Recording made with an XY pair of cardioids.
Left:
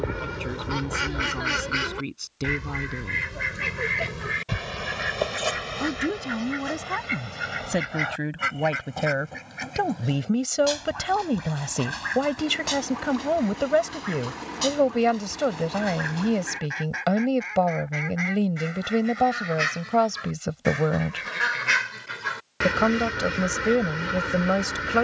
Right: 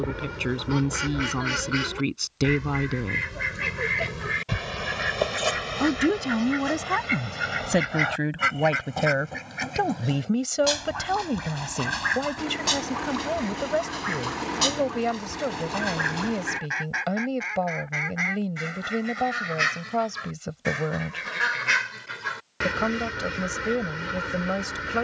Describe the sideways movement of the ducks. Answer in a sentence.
In this clip you hear the ducks go right and come back.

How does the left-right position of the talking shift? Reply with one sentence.
You can hear the talking go from the right side to the left.